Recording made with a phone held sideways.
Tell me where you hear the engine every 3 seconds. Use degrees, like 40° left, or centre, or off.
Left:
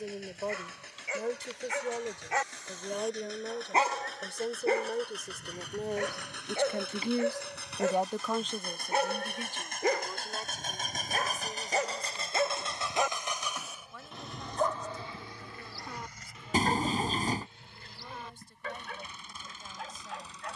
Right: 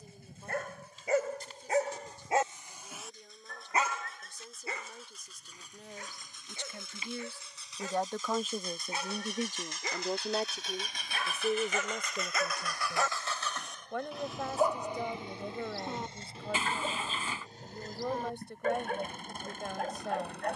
80° left, 70° left, 70° left, 50° left, 10° left, 30° right, 50° right.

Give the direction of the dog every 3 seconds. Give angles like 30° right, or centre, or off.
40° right, 50° left, 70° left, 50° left, 10° left, 30° right, 50° right.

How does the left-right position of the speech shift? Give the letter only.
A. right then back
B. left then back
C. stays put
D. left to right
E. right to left
D.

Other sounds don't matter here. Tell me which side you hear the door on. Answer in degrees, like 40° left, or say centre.
40° left.